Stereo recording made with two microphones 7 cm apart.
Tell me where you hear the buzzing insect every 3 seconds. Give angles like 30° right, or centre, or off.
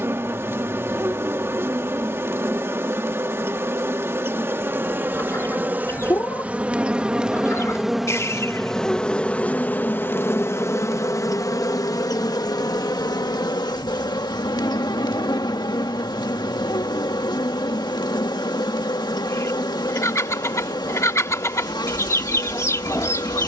30° right, 30° right, 10° right, 40° left, 70° left, 70° left, 70° left, 70° left.